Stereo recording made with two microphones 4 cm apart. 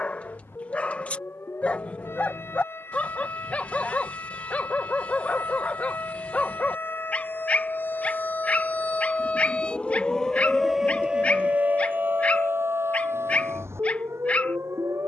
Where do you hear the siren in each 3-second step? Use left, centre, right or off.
left, left, left, centre, right.